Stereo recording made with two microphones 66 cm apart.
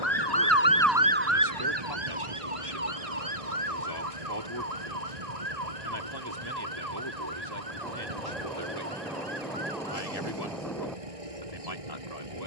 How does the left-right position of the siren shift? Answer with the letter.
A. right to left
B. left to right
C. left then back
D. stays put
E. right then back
B.